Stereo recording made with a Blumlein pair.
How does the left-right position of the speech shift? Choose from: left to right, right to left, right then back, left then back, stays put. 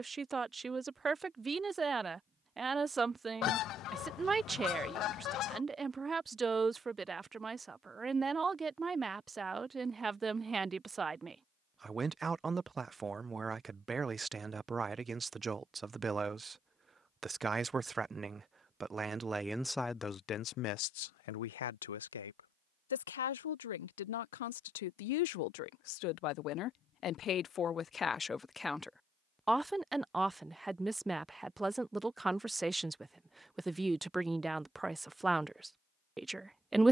left then back.